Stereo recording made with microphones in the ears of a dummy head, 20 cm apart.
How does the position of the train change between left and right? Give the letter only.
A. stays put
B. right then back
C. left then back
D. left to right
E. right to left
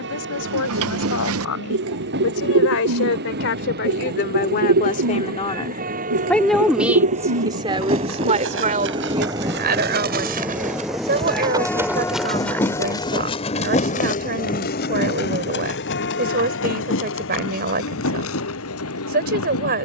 E.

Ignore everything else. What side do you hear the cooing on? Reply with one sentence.
In this clip you hear the cooing on the right.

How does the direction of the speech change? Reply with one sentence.
You can hear the speech move from left to right.